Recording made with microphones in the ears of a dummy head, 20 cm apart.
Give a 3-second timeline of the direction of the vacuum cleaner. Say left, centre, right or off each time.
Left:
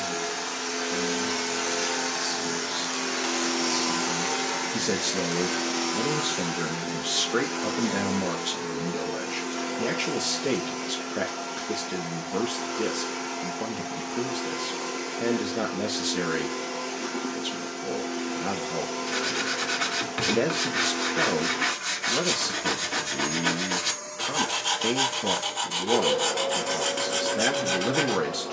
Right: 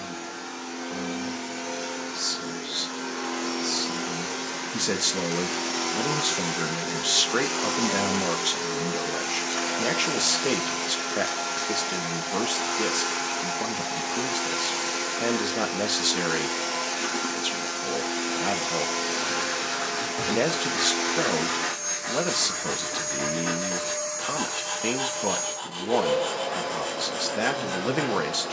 left, centre, right, right, right, right, right, right, right, right.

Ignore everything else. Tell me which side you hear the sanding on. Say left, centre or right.
left.